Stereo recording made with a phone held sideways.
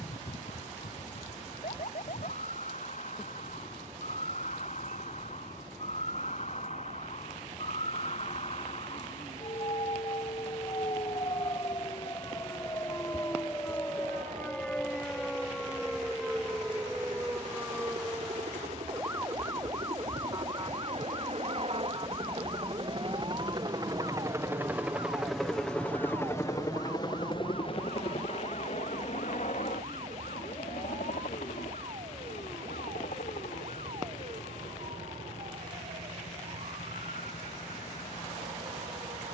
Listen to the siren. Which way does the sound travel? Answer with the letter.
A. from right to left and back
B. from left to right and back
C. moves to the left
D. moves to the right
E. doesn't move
D.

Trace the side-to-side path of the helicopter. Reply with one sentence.
In this clip you hear the helicopter travel towards the left.